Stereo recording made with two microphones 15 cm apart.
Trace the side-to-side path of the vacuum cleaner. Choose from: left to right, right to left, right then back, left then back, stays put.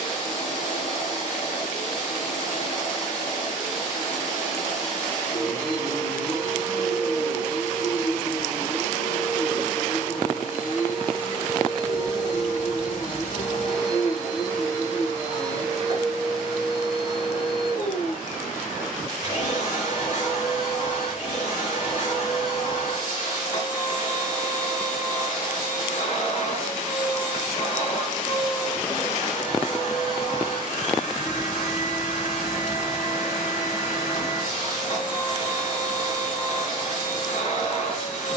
stays put.